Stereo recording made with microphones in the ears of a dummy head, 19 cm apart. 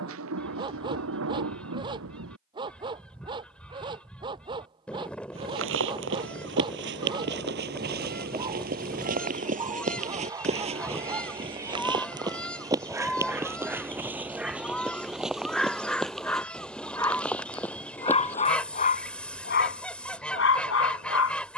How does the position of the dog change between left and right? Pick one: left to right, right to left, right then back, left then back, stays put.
right to left.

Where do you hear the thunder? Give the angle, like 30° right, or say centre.
70° right.